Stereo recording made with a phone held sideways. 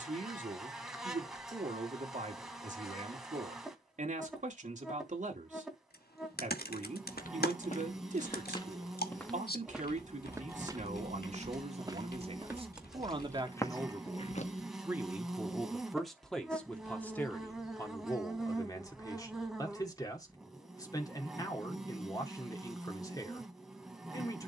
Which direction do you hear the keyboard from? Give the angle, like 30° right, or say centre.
80° left.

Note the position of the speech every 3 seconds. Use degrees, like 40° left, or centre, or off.
50° right, 50° right, 50° right, 50° right, 30° right, centre, 20° left, 20° left.